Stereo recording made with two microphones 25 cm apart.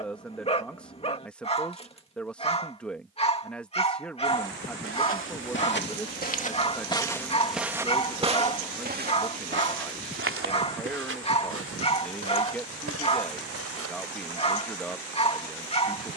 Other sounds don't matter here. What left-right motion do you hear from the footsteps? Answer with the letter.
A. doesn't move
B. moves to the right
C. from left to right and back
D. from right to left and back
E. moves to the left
B.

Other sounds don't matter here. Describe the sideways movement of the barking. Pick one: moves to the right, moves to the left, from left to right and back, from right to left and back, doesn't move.
doesn't move.